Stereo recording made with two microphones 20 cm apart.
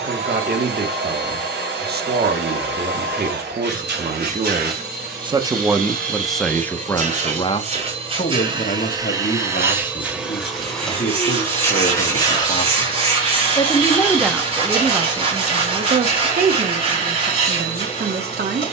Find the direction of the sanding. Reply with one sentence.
You can hear the sanding on the right.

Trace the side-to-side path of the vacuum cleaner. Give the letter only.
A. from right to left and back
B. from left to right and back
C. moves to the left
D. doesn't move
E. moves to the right
C.